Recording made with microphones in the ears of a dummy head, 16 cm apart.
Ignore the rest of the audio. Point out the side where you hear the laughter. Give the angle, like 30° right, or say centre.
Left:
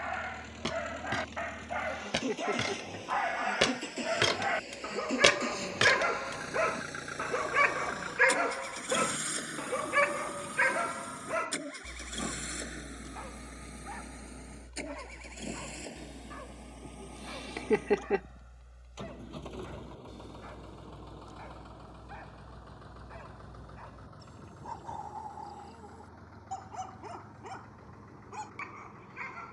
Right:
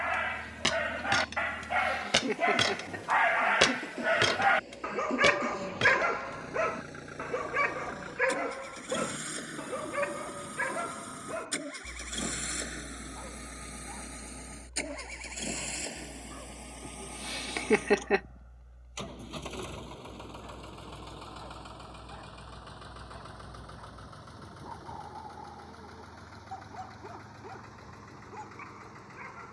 50° right.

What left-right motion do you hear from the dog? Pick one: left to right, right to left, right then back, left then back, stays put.
right to left.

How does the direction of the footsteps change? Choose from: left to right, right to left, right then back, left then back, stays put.
right to left.